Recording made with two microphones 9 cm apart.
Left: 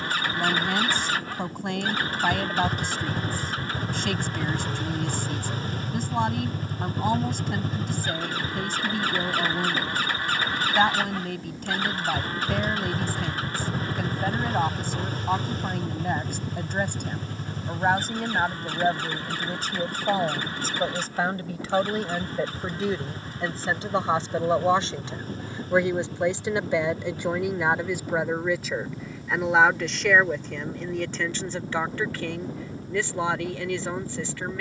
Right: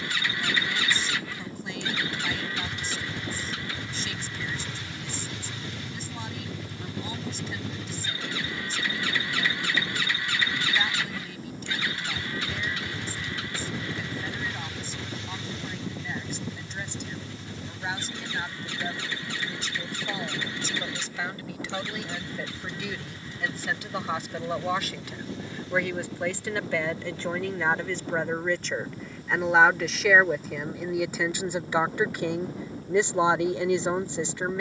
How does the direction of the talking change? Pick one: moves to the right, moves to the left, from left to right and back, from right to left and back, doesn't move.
moves to the right.